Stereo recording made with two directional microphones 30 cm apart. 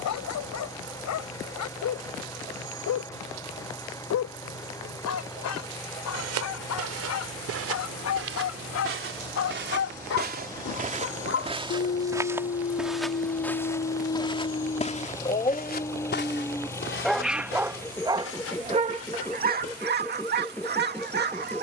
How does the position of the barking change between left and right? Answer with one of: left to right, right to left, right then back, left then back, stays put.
left to right.